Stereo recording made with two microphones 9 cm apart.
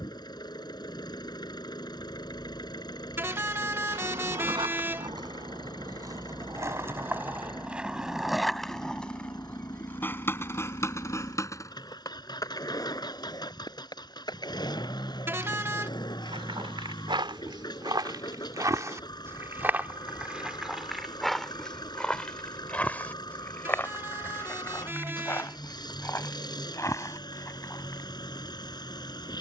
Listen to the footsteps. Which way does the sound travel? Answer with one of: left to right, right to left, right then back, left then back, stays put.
right to left.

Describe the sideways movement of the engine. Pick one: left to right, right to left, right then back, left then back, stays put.
stays put.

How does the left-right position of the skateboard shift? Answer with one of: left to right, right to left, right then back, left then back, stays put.
right to left.